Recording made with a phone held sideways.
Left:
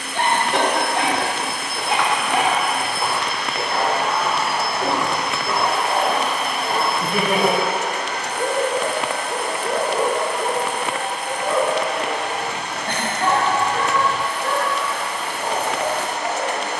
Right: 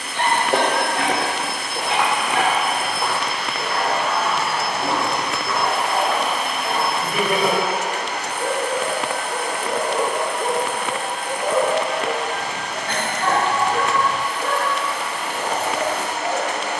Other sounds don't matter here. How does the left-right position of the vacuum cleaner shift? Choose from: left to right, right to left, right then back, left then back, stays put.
right to left.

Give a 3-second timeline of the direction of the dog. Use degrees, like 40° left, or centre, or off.
40° left, 40° left, 40° left, centre, 50° right, 70° right.